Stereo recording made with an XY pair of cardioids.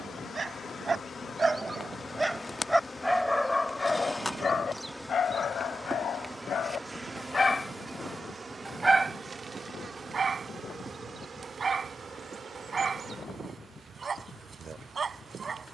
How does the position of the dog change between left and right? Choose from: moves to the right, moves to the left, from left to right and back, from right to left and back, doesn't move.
from right to left and back.